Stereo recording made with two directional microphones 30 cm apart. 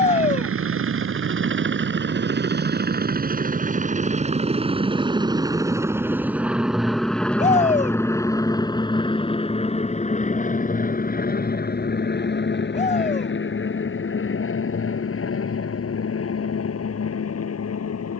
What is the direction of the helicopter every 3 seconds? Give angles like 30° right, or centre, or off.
40° right, 20° right, centre, 20° left, 40° left, 50° left.